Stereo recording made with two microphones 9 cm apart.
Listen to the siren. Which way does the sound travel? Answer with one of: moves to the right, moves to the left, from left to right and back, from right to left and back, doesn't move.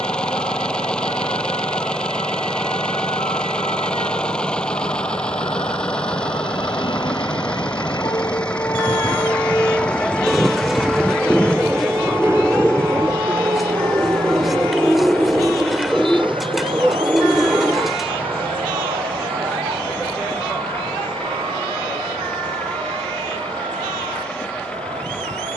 moves to the right.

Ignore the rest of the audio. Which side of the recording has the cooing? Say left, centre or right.
centre.